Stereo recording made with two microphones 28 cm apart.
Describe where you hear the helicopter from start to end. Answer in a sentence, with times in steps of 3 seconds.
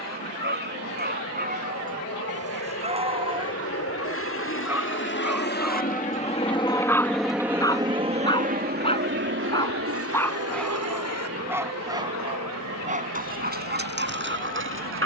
You can hear the helicopter on the left from 0 s, in the centre from 6 s and on the right from 9 s.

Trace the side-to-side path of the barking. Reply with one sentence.
In this clip you hear the barking go left and come back.